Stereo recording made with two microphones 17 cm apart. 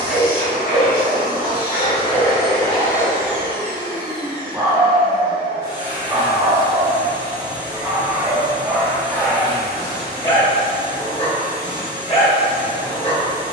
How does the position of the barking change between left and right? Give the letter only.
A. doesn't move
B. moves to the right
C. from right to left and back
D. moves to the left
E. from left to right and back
E.